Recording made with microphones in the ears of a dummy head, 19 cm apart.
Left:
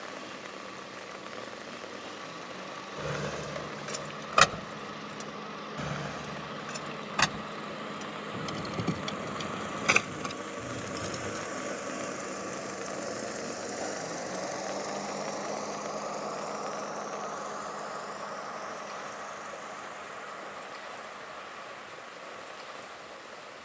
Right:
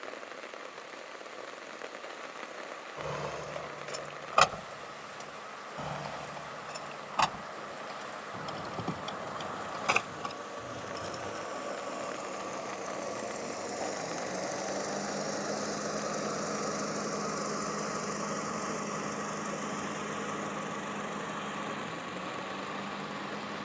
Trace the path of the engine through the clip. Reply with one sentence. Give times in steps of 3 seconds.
You can hear the engine on the left from 0 s, in the centre from 12 s and on the right from 15 s.